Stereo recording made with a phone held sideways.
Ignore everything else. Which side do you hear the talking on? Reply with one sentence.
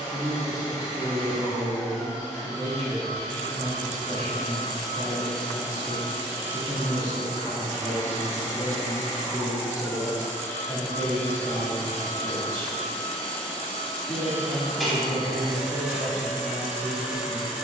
You can hear the talking on the left.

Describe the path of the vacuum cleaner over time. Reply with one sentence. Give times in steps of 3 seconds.
In this clip you hear the vacuum cleaner on the left from 0 s and in the centre from 12 s.